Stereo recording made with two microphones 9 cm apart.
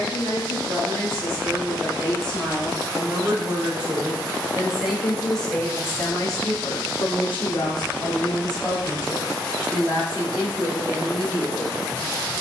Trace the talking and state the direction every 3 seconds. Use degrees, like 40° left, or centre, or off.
30° right, 10° right, 40° left, 30° right.